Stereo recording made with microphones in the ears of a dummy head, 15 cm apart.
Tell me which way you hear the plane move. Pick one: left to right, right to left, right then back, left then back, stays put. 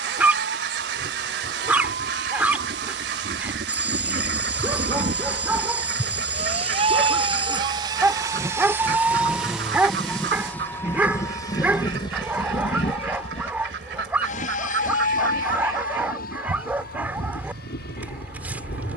right to left.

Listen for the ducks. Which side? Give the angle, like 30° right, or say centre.
70° right.